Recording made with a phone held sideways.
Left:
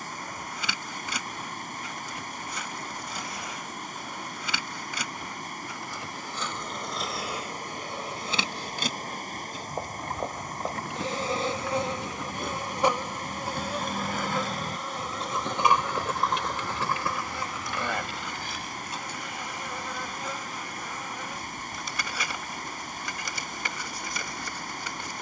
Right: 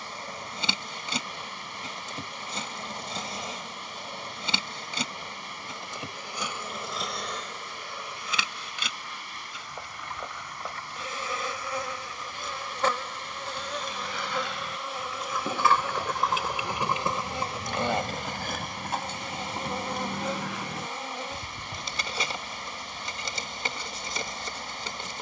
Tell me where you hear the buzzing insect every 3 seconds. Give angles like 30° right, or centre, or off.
30° right, 30° right, 10° left, 40° left, 10° left, 20° right, 30° right, 30° right, 30° right.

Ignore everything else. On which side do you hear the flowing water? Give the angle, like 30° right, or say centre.
50° left.